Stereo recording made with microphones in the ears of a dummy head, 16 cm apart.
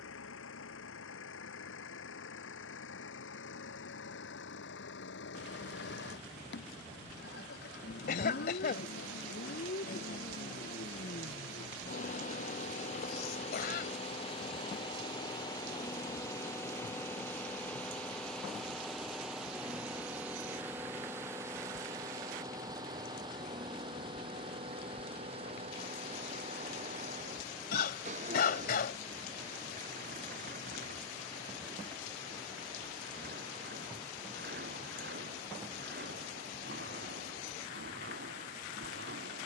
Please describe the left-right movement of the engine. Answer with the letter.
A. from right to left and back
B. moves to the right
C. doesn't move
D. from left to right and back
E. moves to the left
B.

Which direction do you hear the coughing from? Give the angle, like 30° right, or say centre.
60° left.